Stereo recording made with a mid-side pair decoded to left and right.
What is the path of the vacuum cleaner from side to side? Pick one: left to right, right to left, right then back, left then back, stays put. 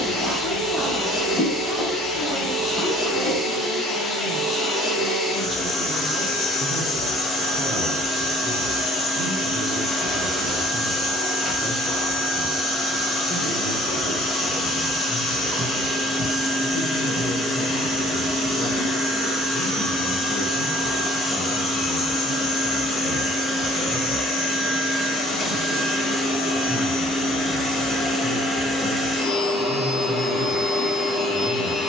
stays put.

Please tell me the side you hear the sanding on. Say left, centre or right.
centre.